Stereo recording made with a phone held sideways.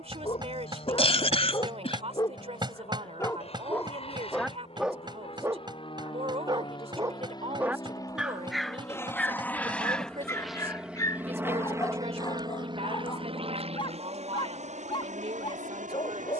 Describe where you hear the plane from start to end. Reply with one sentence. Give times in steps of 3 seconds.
You can hear the plane on the left from 0 s, in the centre from 9 s and on the right from 12 s.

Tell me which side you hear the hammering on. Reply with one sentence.
You can hear the hammering on the right.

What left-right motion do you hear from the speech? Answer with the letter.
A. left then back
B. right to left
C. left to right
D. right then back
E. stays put
E.